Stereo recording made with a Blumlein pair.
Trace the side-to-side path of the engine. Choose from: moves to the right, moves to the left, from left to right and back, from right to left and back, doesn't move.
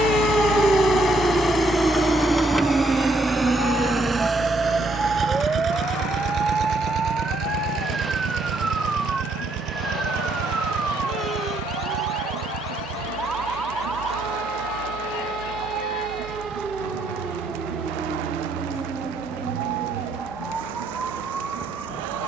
moves to the right.